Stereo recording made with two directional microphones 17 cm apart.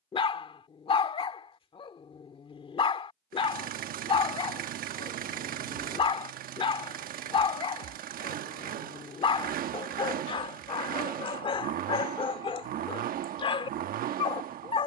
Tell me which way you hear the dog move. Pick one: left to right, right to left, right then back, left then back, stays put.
stays put.